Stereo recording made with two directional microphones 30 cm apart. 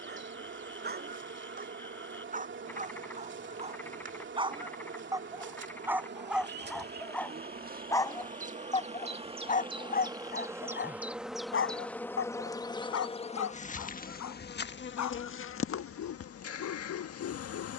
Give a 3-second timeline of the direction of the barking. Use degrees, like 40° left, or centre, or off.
30° right, 20° right, 10° left, 30° left, 60° left, 60° left.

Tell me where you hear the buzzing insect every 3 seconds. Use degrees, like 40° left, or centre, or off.
40° right, 40° right, 30° right, 10° right, 20° left, 50° left.